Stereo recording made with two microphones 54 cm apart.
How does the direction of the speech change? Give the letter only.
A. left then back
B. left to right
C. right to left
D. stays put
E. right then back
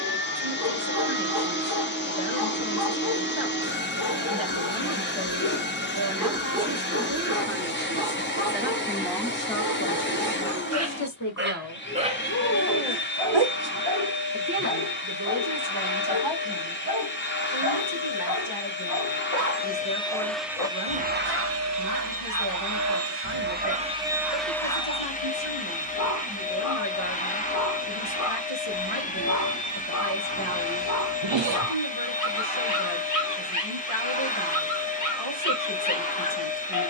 A.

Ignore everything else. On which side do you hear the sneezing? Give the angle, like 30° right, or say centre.
60° right.